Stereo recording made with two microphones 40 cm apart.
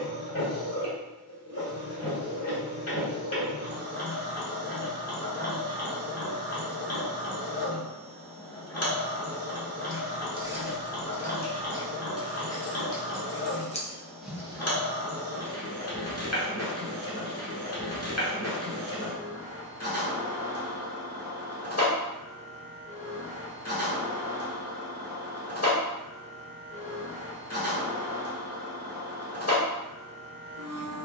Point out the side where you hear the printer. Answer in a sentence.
You can hear the printer on the left.